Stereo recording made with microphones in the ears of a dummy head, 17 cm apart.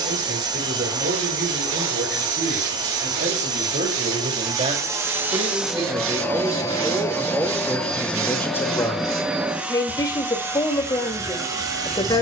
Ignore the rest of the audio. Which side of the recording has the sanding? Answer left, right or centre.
right.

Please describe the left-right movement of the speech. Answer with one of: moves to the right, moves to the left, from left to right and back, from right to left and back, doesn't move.
moves to the left.